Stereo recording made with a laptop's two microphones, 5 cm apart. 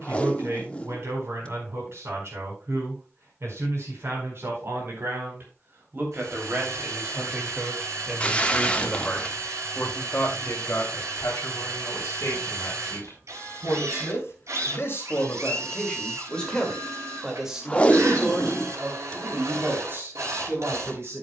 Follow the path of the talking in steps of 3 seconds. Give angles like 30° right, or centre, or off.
60° right, 50° right, 20° right, 50° left, 60° left, 10° left, 40° right.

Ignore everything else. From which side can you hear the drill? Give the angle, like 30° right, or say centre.
70° right.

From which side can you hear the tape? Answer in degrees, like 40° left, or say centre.
20° left.